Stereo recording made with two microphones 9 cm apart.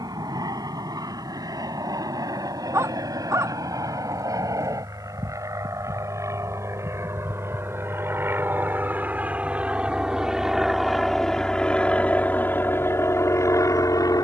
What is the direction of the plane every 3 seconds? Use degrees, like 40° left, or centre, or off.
50° right, 40° right, 30° right, centre, 30° left.